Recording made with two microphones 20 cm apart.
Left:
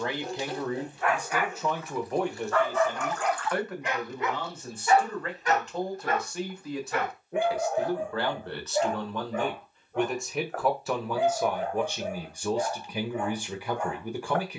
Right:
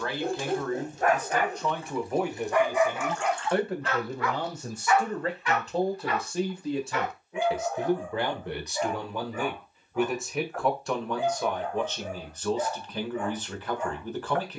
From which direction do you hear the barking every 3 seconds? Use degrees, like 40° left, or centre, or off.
30° right, 20° left, 60° left, 70° left, 70° left.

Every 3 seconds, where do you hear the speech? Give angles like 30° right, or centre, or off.
centre, 30° right, 20° right, centre, 10° left.